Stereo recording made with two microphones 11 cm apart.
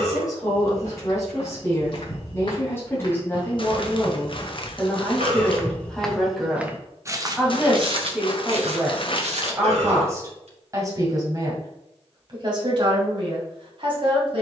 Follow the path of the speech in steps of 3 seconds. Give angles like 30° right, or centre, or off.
20° left, 10° left, 10° right, 30° right, 50° right.